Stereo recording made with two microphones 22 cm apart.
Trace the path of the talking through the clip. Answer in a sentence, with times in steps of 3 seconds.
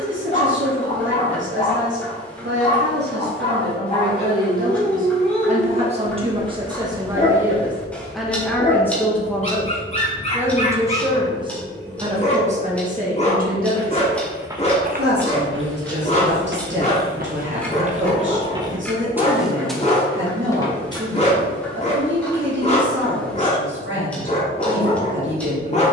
In this clip you hear the talking on the right from 0 s, in the centre from 6 s and on the right from 12 s.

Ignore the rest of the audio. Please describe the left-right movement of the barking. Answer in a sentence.
You can hear the barking stay put.